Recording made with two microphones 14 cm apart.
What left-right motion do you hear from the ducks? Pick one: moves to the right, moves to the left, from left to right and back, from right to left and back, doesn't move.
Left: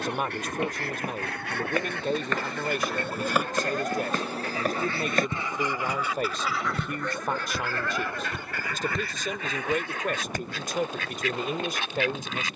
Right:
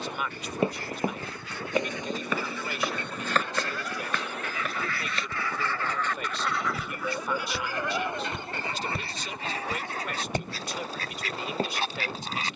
moves to the right.